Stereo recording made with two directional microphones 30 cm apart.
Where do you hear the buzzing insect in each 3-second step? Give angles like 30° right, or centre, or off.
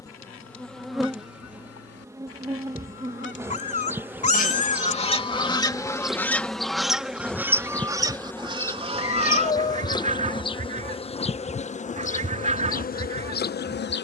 centre, 10° right, centre, 20° left, 30° left.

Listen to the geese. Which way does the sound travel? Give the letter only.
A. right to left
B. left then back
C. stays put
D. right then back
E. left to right
E.